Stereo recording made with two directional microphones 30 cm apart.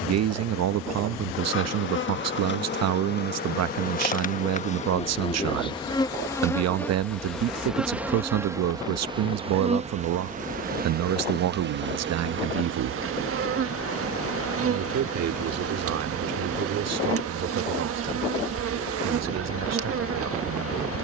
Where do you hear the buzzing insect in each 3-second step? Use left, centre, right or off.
left, left, centre, right, right, right, right.